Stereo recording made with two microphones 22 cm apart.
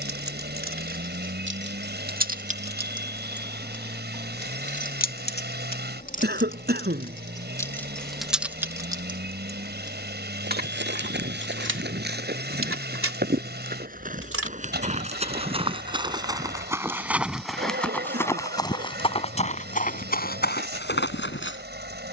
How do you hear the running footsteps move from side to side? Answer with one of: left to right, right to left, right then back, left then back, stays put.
right to left.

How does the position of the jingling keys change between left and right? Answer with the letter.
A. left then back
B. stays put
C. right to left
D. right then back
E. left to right
A.